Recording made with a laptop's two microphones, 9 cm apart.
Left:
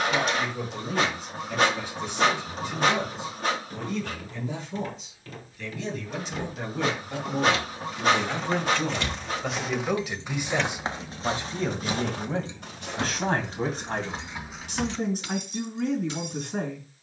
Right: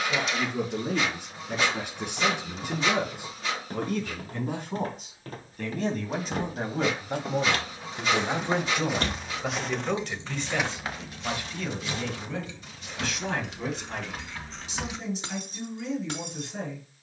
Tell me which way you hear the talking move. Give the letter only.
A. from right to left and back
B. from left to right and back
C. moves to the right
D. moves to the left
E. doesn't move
D.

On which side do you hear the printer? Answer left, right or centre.
left.